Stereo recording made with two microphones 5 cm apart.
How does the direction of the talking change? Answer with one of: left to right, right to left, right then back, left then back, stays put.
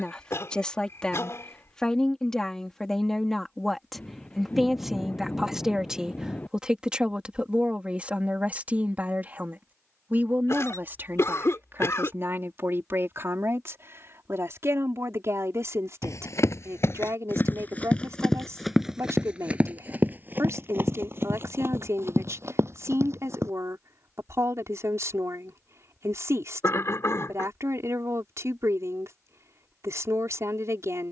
left to right.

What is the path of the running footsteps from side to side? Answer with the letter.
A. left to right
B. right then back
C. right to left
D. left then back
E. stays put
A.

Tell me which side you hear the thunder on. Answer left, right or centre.
left.